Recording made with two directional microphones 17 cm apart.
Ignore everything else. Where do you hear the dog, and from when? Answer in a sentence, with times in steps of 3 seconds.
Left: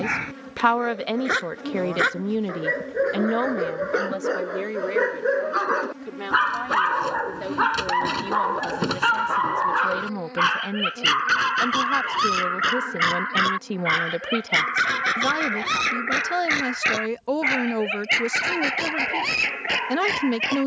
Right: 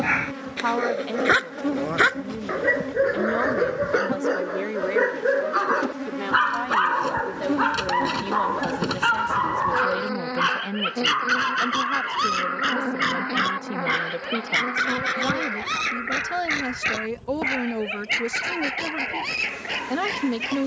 In this clip you hear the dog on the right from 0 s, in the centre from 6 s and on the left from 12 s.